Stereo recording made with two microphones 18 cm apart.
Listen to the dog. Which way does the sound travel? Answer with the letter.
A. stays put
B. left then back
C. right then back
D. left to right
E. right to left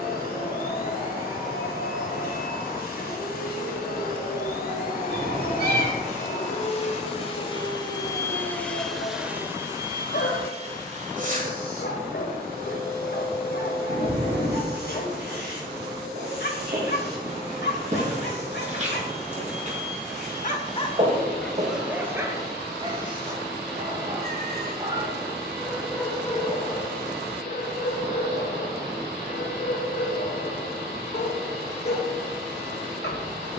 C.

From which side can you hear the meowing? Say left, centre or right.
right.